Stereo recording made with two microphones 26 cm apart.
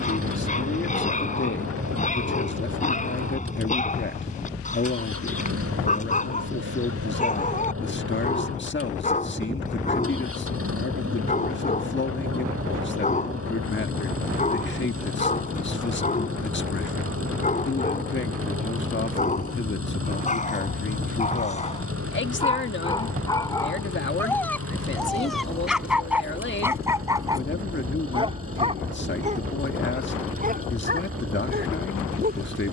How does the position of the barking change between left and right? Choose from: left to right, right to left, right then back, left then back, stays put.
left to right.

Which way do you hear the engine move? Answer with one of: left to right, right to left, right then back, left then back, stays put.
stays put.